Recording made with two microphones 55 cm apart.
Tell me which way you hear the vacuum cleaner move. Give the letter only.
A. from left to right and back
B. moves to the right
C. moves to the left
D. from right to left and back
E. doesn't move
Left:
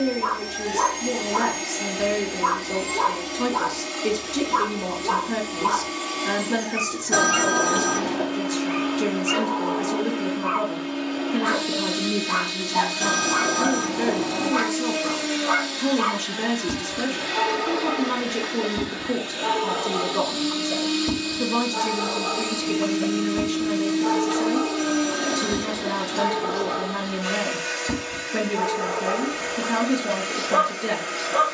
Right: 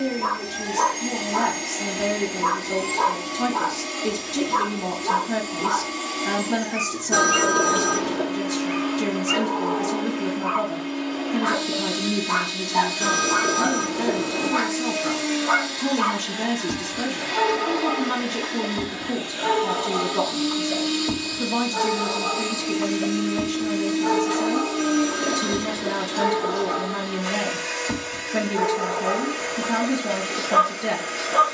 E.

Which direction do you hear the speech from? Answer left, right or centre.
centre.